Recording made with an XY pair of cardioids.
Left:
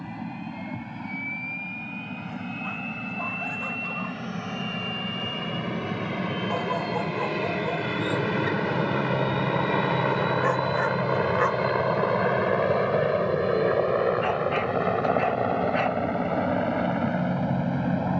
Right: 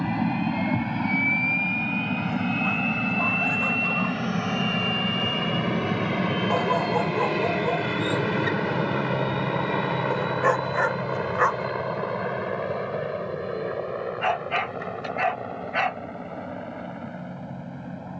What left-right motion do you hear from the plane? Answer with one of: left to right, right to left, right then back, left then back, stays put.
right to left.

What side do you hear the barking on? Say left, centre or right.
right.